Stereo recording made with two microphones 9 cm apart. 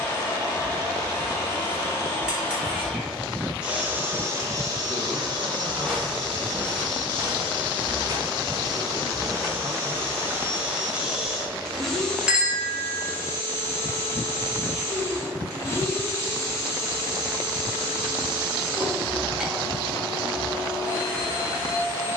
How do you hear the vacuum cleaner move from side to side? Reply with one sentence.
In this clip you hear the vacuum cleaner go right and come back.